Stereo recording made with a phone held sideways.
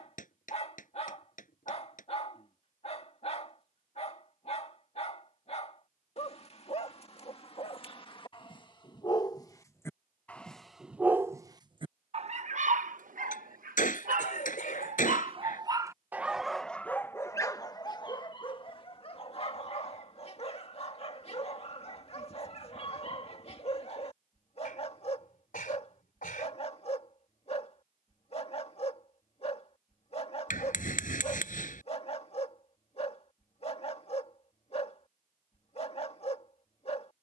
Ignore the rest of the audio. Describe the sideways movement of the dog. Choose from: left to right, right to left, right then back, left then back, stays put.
right then back.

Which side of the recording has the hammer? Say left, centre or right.
left.